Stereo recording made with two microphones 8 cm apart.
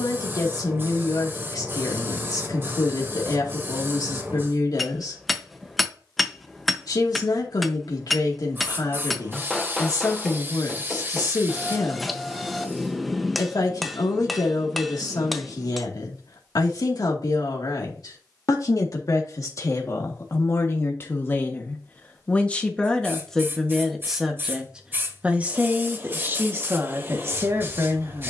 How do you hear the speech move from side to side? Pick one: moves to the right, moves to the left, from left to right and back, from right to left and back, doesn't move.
moves to the right.